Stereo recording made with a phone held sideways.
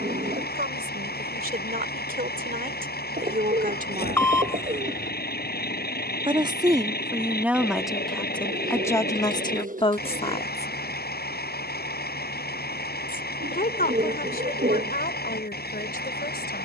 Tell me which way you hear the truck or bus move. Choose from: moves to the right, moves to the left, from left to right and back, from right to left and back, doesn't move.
doesn't move.